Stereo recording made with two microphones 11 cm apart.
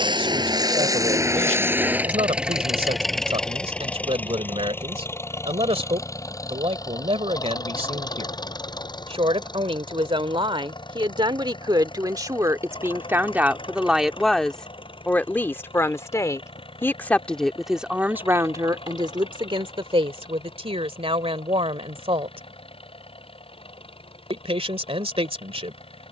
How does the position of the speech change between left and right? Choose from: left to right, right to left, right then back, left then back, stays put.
left then back.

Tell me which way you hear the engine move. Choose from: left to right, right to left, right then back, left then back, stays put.
right to left.